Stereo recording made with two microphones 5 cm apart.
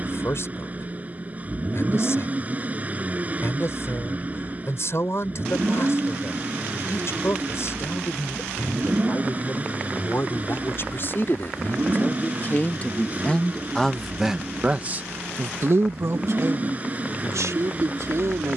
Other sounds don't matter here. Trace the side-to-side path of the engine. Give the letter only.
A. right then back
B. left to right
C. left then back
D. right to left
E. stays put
E.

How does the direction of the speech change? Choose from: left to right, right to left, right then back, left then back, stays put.
left to right.